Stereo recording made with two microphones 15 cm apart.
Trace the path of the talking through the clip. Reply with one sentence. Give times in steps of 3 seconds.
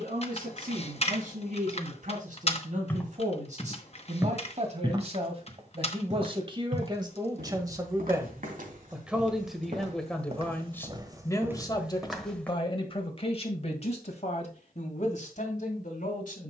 You can hear the talking on the right from 0 s, in the centre from 9 s and on the left from 12 s.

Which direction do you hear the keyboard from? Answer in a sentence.
In this clip you hear the keyboard on the left.